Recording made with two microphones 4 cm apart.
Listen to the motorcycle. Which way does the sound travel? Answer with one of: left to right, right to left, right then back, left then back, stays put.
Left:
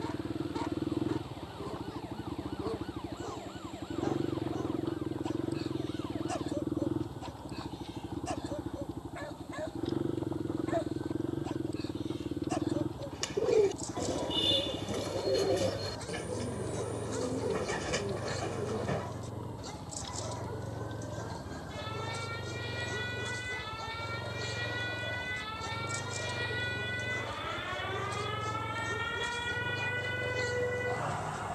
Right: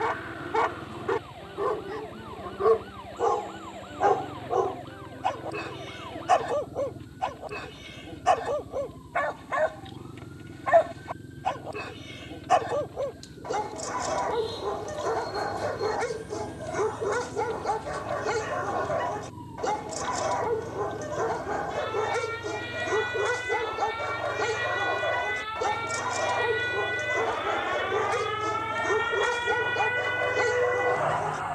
stays put.